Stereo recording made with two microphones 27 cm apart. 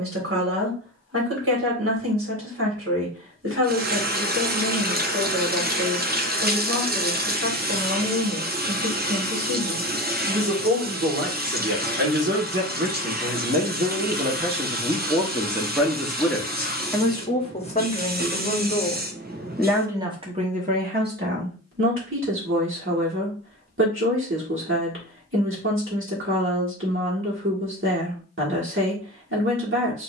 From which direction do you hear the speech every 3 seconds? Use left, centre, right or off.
right, right, right, right, right, centre, centre, right, right, right.